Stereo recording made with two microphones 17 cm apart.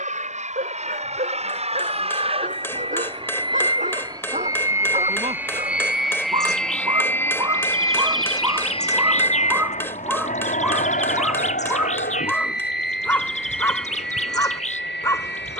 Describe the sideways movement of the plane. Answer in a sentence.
In this clip you hear the plane travel towards the left.